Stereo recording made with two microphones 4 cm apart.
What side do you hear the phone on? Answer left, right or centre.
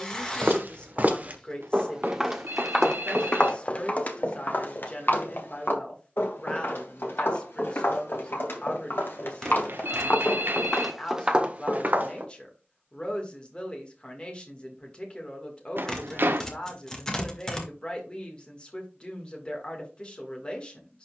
right.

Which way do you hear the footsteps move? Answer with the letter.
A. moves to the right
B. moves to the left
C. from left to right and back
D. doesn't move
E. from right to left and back
E.